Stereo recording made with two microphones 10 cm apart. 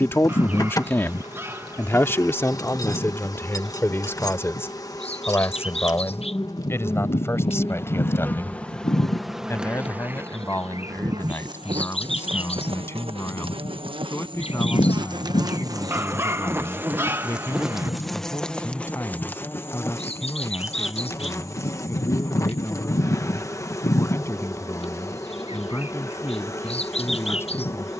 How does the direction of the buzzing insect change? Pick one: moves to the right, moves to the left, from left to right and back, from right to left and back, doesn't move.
from left to right and back.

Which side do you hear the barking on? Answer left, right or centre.
right.